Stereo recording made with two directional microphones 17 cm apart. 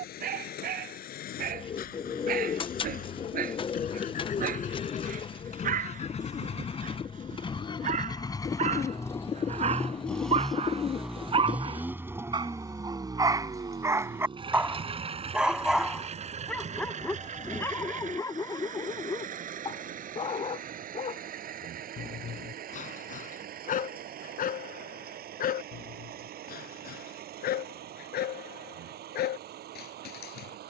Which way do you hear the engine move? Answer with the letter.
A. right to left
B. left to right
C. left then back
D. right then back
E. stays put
B.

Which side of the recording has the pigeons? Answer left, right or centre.
left.